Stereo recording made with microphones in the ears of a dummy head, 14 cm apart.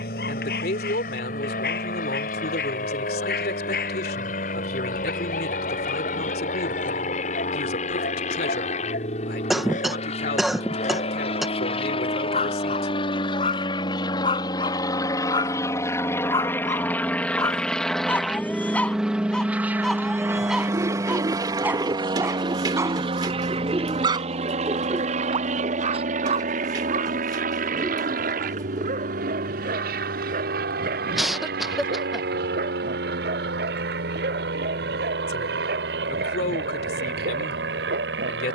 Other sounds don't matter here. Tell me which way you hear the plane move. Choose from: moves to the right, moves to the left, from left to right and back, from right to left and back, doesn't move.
moves to the right.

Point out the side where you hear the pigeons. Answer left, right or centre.
right.